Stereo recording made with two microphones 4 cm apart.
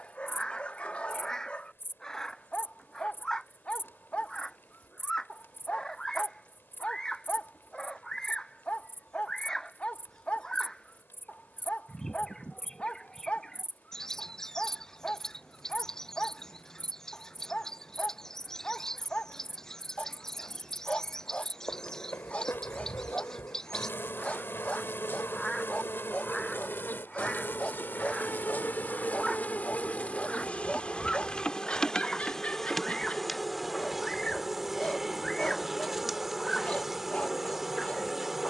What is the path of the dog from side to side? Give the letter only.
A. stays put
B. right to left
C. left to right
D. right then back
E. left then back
A.